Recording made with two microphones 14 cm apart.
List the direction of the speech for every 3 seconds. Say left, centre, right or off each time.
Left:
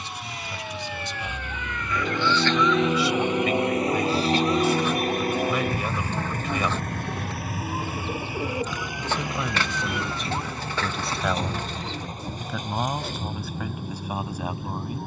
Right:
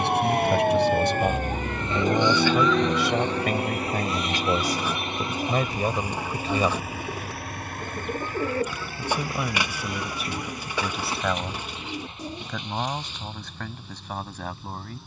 right, right, right, centre, centre.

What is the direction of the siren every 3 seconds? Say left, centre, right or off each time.
right, left, left, left, left.